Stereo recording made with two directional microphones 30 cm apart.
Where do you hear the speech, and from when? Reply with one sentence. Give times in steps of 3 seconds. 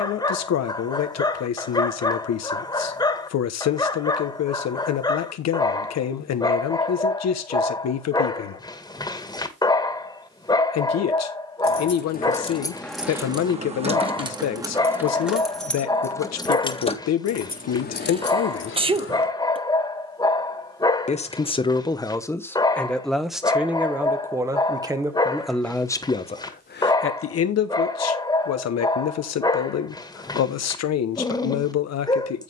In this clip you hear the speech on the left from 0 s, in the centre from 21 s and on the left from 27 s.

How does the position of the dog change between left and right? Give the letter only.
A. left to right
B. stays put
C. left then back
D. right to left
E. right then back
B.